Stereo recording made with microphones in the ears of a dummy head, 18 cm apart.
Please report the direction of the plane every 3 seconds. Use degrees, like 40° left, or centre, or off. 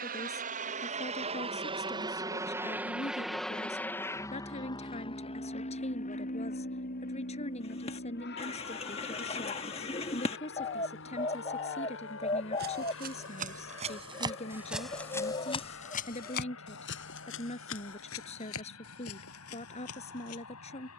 30° right, 20° left, 50° left, 60° left, 70° left, 70° left, 70° left.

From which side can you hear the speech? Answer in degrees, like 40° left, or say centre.
30° left.